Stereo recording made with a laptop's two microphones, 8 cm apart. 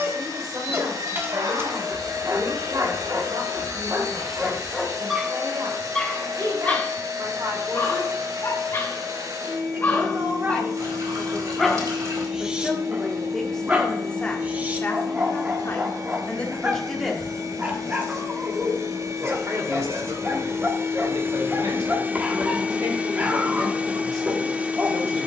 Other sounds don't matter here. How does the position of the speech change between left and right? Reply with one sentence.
In this clip you hear the speech go left and come back.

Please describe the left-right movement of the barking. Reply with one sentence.
You can hear the barking go left and come back.